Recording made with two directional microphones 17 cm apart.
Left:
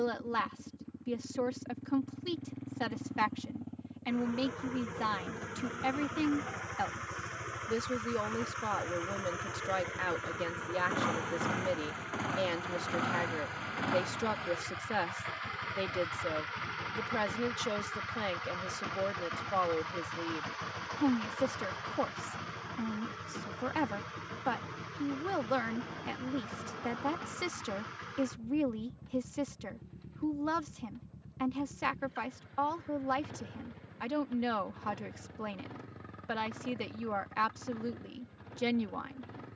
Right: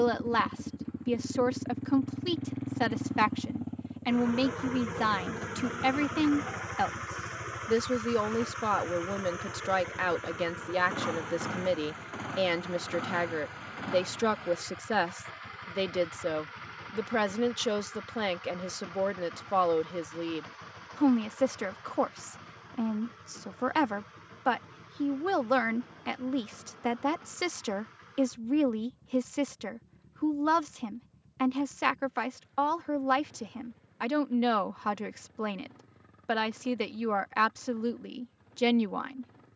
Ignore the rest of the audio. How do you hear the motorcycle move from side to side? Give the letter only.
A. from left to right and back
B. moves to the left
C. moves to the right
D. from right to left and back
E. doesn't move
B.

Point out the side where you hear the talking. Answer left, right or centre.
right.